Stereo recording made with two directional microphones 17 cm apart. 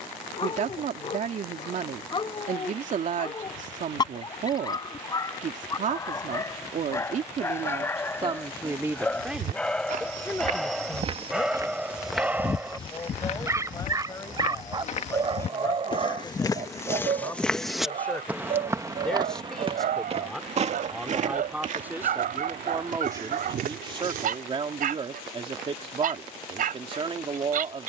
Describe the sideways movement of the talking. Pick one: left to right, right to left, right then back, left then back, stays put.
left then back.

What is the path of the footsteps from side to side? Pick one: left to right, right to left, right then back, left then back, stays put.
left then back.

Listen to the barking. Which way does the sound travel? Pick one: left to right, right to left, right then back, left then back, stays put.
left to right.